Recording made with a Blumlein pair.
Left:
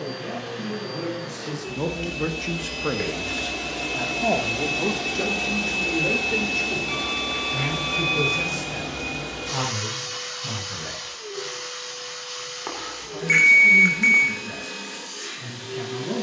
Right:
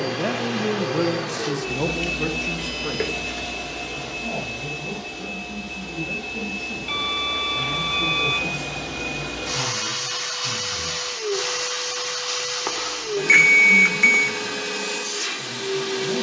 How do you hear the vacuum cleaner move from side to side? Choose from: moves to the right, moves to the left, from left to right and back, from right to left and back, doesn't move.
from right to left and back.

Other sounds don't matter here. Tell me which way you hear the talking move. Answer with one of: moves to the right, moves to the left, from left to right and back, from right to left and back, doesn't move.
moves to the left.